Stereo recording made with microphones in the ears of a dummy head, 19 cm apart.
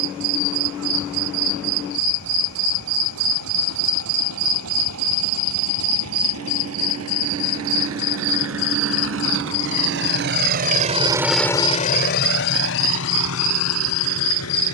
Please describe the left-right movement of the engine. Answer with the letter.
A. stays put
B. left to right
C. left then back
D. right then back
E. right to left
E.